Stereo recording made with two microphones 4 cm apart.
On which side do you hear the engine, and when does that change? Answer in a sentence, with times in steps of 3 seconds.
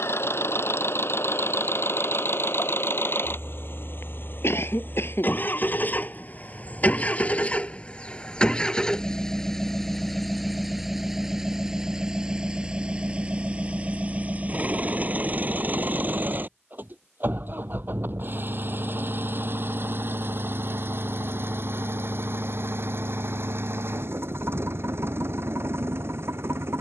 You can hear the engine on the left from 0 s, in the centre from 9 s and on the right from 12 s.